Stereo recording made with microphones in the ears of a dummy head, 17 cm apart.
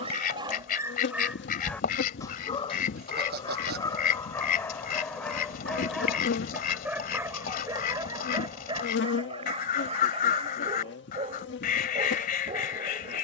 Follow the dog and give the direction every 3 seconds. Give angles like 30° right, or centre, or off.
centre, 10° left, 20° right, 30° right, 30° right.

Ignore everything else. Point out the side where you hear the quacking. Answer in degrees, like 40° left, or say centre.
50° left.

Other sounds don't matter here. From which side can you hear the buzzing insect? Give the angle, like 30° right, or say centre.
60° left.